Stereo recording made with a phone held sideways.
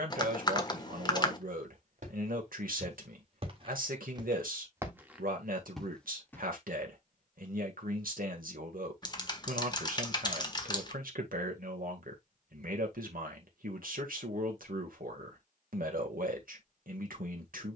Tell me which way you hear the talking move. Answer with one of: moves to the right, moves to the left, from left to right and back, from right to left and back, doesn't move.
doesn't move.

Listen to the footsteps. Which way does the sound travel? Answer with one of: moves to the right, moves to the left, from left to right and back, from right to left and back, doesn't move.
moves to the left.